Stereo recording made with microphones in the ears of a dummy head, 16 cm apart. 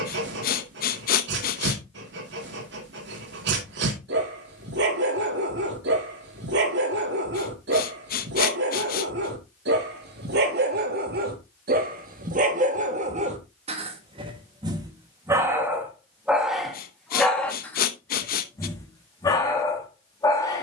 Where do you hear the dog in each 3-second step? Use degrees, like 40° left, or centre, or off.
70° right, 70° right, 70° right, 60° right, 40° right, centre, 20° left.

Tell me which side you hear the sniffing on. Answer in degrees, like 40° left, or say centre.
50° left.